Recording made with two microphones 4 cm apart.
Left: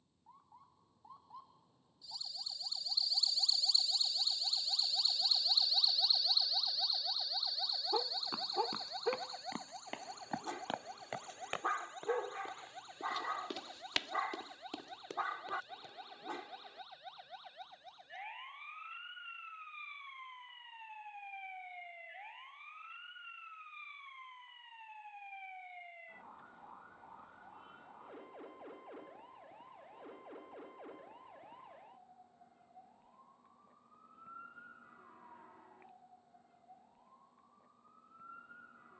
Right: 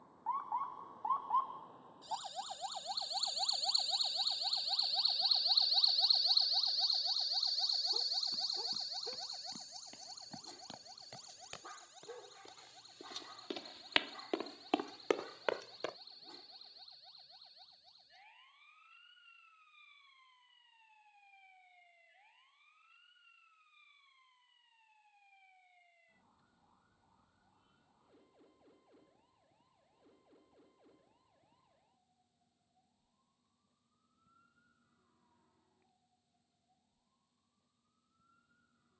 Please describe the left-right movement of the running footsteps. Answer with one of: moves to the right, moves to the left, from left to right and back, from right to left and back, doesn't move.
moves to the right.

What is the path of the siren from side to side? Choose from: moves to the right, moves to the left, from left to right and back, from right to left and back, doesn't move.
moves to the left.